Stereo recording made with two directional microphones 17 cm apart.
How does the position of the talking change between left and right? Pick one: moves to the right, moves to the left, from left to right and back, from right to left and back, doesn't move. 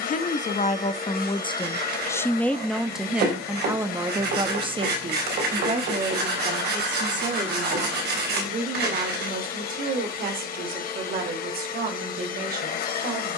moves to the right.